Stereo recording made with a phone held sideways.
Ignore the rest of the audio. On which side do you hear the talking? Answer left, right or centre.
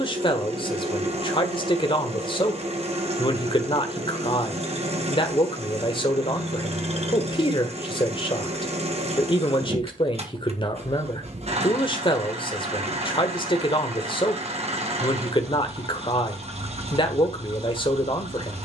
left.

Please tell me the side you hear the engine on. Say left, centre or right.
right.